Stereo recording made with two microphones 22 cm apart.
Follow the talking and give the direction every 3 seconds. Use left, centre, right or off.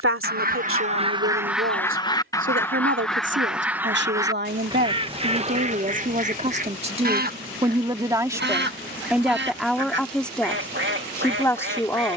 right, right, right, centre.